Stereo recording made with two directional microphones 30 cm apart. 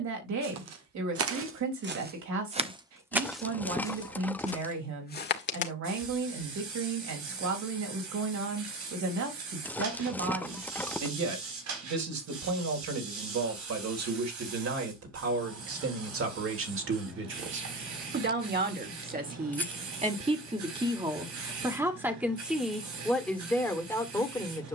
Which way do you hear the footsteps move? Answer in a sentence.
You can hear the footsteps move to the left.